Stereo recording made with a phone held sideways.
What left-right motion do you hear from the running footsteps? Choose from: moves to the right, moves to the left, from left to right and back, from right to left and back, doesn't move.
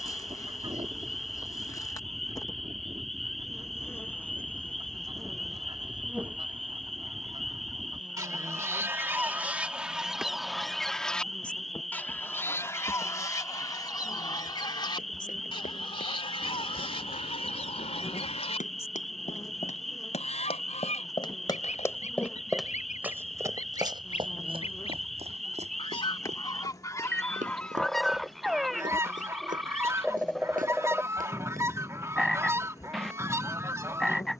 moves to the right.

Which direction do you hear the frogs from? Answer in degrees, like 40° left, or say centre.
centre.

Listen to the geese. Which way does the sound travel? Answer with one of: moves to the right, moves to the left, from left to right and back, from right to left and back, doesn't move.
from right to left and back.